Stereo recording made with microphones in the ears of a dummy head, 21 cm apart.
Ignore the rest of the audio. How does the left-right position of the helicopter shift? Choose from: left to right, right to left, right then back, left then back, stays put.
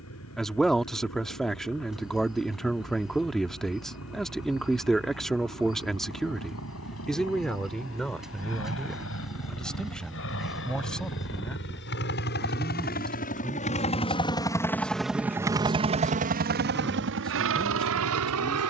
left to right.